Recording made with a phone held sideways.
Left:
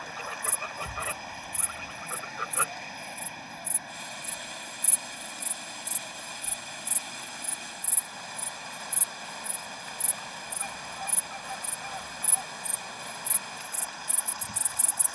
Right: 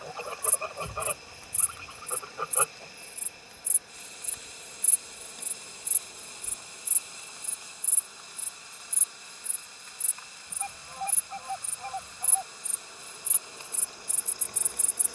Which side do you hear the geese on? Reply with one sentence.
In this clip you hear the geese on the right.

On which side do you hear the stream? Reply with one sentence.
In this clip you hear the stream on the left.